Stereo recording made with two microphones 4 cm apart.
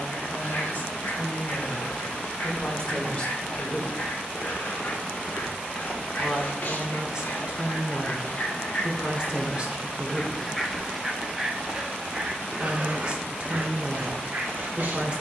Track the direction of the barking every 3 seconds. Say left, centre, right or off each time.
left, left, left, centre, right.